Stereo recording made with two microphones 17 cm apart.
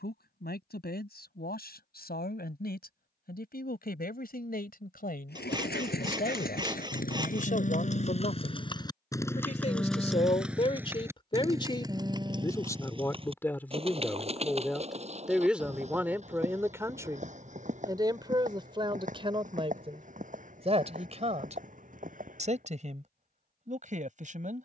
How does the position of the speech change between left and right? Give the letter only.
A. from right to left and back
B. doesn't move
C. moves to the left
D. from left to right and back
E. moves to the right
E.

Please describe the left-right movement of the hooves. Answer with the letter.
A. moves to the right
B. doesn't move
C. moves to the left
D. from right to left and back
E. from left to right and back
A.